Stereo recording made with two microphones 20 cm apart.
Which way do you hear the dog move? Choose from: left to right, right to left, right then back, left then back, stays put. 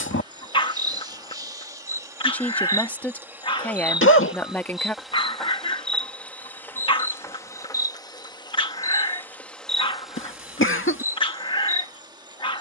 stays put.